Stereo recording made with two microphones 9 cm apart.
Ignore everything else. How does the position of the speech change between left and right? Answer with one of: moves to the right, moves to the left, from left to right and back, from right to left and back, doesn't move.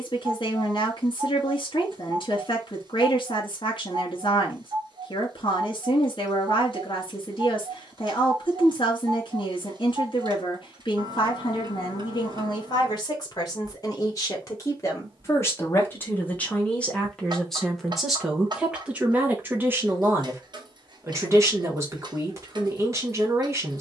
moves to the right.